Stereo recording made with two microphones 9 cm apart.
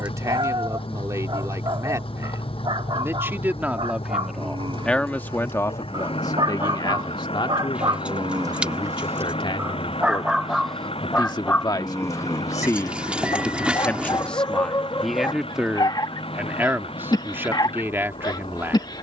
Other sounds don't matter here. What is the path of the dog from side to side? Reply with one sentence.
You can hear the dog travel towards the left.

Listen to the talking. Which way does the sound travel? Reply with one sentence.
You can hear the talking move from right to left and back again.